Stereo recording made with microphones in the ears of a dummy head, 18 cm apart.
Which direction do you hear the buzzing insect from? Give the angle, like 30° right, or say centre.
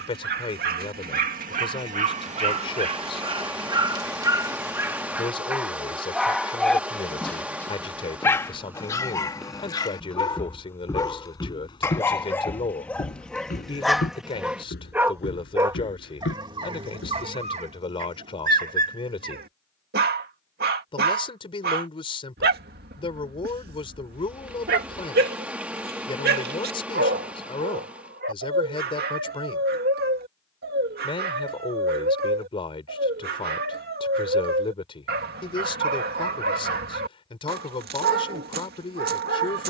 10° right.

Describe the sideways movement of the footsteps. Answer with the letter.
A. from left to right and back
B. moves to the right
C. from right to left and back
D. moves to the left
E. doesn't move
D.